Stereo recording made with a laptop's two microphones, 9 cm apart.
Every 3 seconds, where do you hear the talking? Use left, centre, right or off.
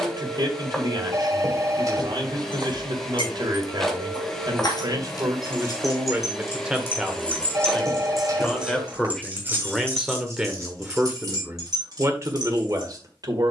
right, right, centre, centre, right.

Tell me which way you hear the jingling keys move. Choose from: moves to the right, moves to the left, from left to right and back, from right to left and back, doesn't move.
moves to the right.